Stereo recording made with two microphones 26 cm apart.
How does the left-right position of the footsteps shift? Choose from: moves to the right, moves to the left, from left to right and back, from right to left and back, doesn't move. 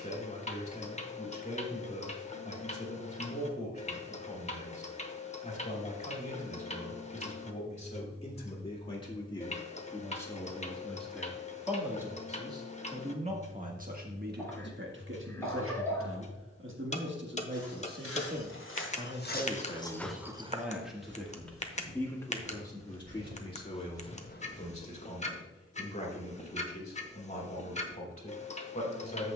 from left to right and back.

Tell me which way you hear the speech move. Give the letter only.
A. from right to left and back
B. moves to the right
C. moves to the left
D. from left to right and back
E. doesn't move
D.